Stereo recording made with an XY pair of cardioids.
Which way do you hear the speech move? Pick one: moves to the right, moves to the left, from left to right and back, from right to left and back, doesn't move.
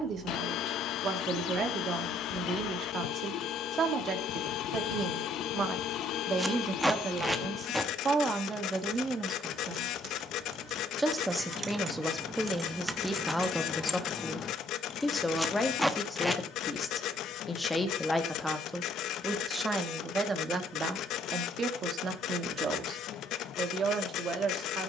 from right to left and back.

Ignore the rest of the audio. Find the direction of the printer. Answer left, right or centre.
left.